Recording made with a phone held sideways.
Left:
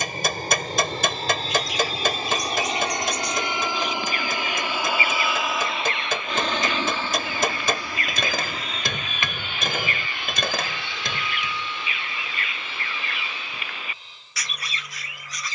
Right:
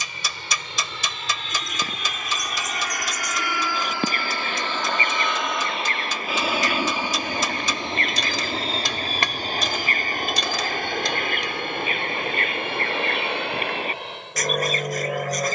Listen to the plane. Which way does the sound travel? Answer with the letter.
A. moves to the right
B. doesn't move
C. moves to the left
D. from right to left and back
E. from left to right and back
A.